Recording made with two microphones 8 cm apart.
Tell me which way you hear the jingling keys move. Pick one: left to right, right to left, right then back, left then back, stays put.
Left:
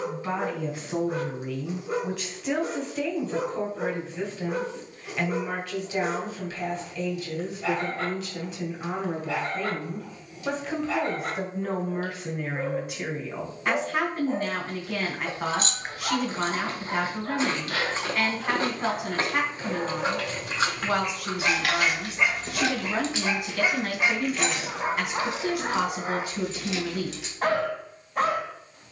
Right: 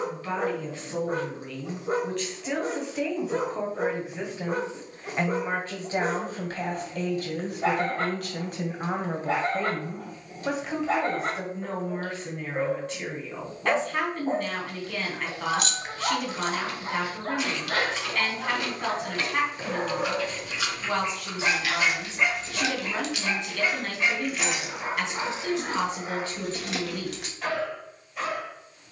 left to right.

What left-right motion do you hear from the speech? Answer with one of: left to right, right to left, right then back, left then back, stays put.
right then back.